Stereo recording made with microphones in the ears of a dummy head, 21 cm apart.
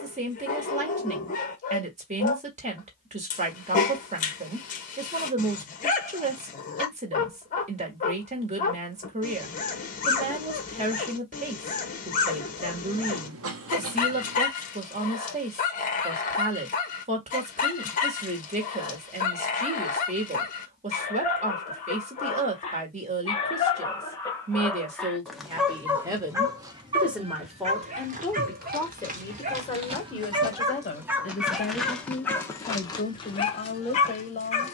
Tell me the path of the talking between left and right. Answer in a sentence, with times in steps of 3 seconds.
In this clip you hear the talking on the right from 0 s, in the centre from 27 s and on the left from 30 s.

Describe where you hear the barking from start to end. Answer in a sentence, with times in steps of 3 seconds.
You can hear the barking on the left from 0 s, in the centre from 24 s, on the right from 27 s, in the centre from 30 s and on the left from 33 s.